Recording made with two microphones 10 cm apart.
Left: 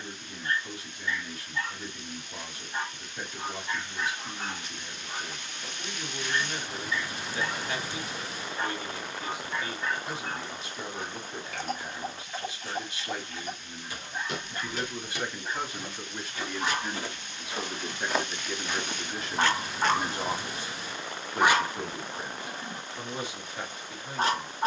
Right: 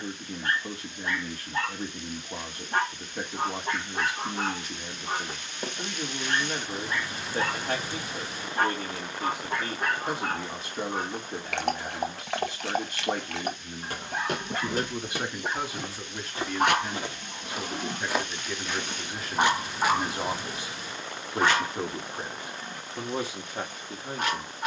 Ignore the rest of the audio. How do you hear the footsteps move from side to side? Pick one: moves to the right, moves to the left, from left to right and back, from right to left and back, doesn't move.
moves to the left.